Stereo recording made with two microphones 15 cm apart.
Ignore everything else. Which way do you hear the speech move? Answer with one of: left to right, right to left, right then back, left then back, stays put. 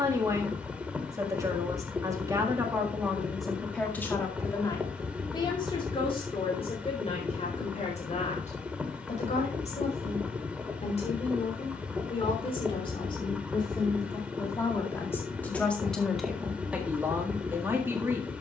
left then back.